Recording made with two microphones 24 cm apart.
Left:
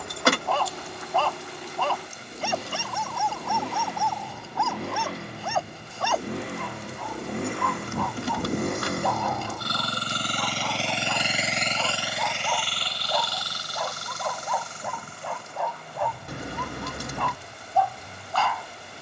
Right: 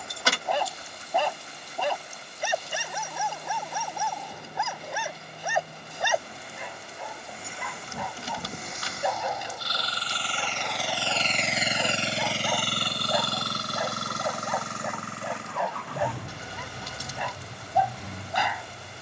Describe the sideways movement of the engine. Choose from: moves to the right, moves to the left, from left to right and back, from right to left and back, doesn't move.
moves to the right.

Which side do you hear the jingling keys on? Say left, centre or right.
left.